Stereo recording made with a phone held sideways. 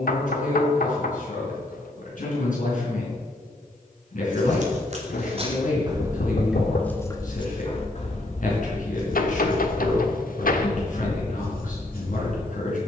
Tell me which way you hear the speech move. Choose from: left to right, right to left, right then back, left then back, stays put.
stays put.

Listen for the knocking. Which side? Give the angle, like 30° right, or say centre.
70° left.